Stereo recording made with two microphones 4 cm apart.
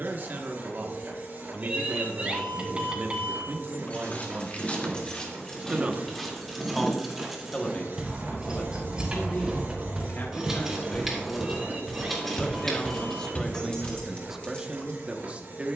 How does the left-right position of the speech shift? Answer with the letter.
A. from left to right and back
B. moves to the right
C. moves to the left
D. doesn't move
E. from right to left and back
E.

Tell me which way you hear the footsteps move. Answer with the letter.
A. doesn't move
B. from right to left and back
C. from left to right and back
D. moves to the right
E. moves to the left
C.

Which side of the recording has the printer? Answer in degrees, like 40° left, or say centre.
50° right.